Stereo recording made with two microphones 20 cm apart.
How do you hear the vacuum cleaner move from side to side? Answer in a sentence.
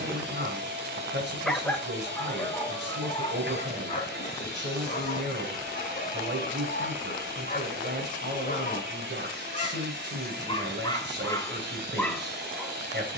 You can hear the vacuum cleaner stay in one place.